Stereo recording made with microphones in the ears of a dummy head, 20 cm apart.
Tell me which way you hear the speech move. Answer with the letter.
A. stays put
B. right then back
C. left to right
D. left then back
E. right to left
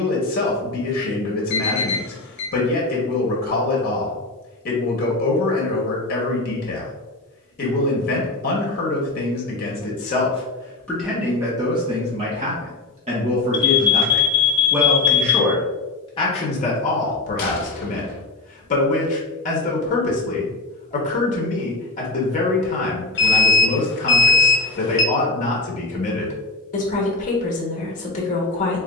B.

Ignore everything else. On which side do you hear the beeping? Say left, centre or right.
left.